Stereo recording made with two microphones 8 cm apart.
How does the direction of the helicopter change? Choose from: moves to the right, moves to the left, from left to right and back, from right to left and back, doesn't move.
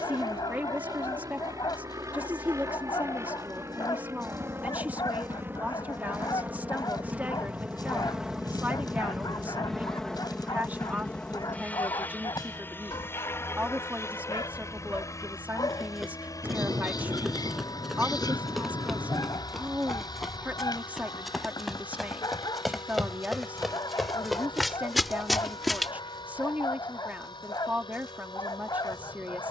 moves to the left.